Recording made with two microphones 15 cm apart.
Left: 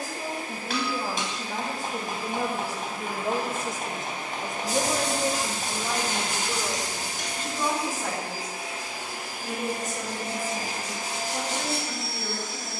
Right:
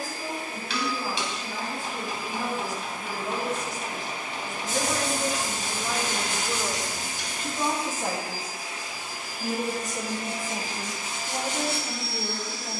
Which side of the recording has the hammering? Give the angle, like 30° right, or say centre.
50° left.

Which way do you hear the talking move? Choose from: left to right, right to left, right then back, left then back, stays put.
left to right.